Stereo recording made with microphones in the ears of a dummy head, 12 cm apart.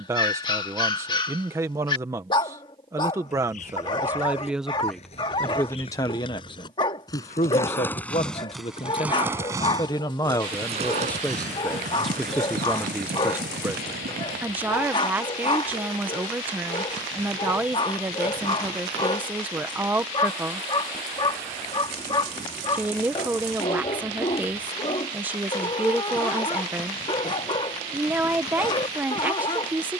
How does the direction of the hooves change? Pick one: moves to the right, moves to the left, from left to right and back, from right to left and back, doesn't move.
moves to the right.